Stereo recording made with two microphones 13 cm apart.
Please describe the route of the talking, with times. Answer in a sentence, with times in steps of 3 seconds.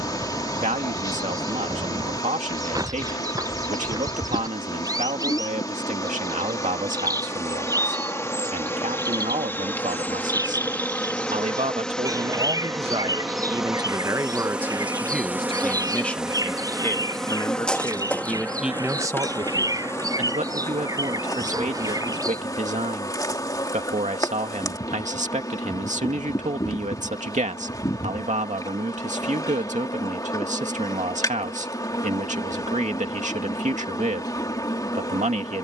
In this clip you hear the talking on the right from 0 s, in the centre from 15 s and on the right from 18 s.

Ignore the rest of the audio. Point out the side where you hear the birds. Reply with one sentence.
You can hear the birds on the right.